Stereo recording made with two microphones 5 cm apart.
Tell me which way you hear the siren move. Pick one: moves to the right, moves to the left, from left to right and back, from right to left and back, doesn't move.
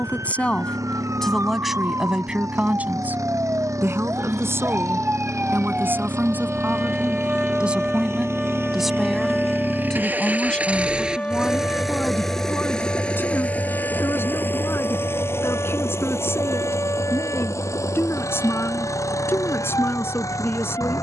moves to the left.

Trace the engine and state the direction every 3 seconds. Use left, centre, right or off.
right, right, right, right, left, left, left.